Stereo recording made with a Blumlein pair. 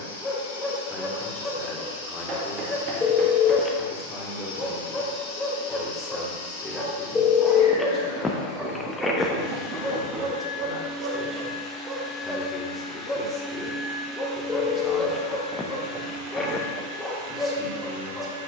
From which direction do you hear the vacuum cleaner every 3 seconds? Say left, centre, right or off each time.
left, left, left, left, centre, right.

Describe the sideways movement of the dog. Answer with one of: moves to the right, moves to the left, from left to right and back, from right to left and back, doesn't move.
from left to right and back.